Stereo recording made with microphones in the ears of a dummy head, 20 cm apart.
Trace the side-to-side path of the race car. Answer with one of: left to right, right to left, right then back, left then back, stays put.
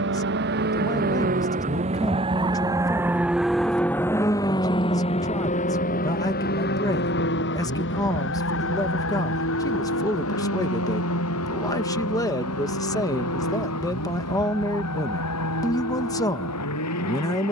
right to left.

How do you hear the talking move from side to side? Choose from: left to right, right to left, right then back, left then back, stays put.
stays put.